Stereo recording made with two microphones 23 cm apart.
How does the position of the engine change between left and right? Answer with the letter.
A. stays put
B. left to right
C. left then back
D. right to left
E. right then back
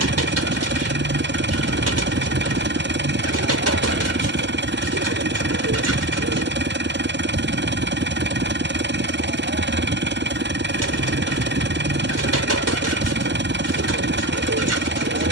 A.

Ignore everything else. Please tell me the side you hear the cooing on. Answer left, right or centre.
right.